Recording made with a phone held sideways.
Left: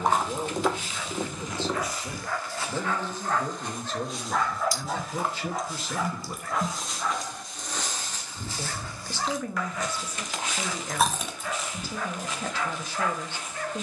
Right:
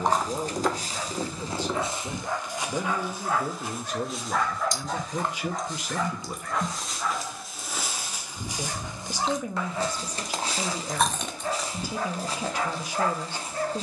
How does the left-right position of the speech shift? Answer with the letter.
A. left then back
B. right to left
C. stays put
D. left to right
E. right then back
C.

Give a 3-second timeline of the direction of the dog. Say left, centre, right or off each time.
right, centre, centre, right, right.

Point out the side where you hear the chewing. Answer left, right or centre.
centre.